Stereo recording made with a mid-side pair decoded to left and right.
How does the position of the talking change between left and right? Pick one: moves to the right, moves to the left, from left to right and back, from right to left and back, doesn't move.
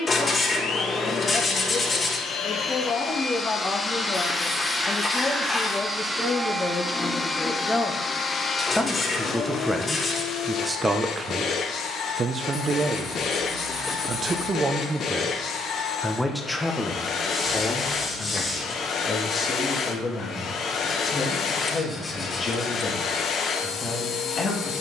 from left to right and back.